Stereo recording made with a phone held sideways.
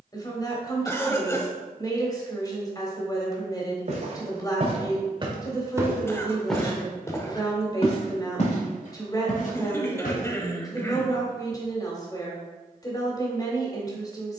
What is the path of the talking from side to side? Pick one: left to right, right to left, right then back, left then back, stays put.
stays put.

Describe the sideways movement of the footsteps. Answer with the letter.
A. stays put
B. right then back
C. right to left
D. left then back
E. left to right
C.